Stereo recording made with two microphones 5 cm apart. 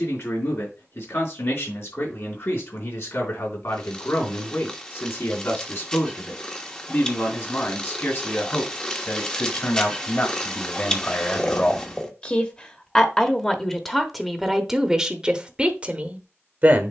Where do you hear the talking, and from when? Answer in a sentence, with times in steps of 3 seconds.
You can hear the talking on the left from 0 s, in the centre from 12 s and on the right from 15 s.